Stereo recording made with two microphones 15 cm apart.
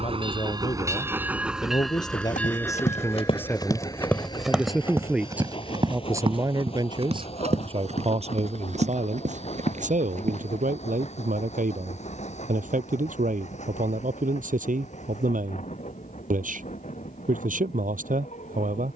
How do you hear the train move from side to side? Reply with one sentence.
You can hear the train move from right to left.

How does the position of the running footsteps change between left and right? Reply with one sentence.
In this clip you hear the running footsteps move from left to right.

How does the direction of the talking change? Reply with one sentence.
You can hear the talking move from left to right.